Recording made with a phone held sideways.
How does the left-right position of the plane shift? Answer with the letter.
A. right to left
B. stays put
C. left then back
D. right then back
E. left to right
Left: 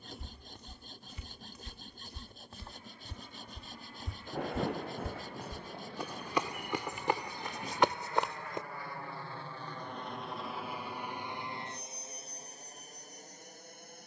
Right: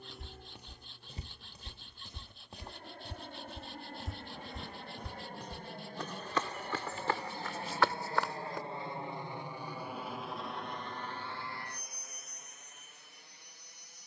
A.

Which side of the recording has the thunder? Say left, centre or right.
left.